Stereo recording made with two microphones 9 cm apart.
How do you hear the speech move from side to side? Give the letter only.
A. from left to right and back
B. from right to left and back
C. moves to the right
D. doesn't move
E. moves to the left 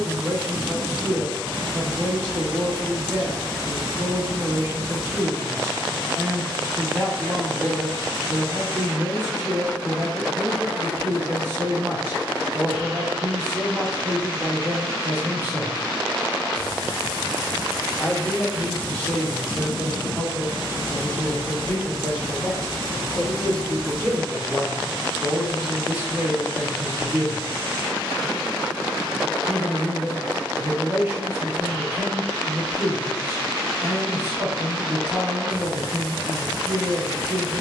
B.